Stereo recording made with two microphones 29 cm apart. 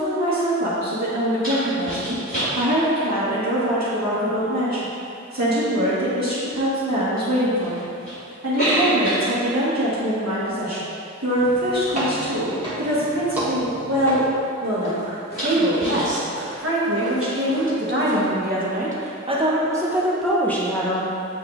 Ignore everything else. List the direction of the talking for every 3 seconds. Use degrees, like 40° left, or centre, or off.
70° right, 70° right, 70° right, 70° right, 70° right, 50° right, 10° right.